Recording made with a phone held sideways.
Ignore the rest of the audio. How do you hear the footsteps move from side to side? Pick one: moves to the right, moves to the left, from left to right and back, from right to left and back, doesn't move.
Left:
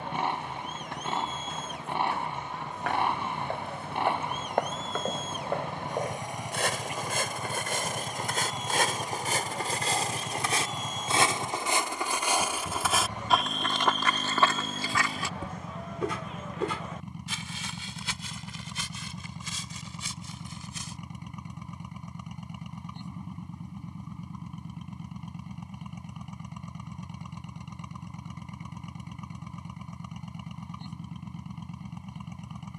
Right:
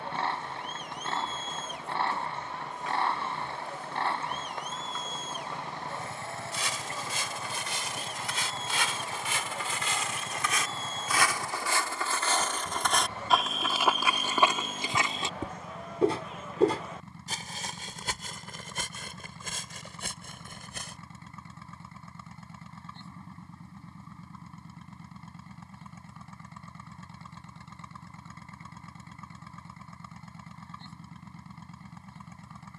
moves to the right.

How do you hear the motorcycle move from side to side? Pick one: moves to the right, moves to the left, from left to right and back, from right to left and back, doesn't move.
doesn't move.